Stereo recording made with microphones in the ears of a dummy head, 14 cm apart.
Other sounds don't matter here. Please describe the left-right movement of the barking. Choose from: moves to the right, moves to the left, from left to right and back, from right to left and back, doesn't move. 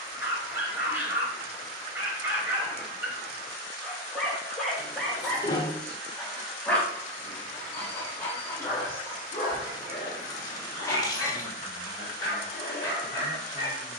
moves to the left.